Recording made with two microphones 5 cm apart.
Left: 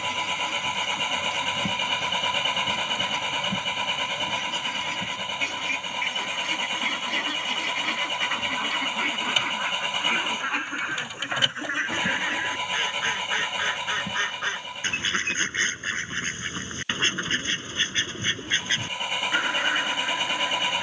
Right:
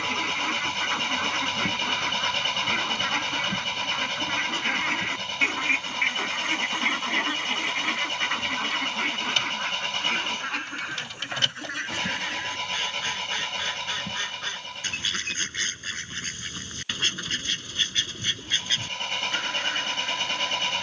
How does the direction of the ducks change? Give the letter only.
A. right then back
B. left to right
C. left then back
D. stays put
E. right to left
E.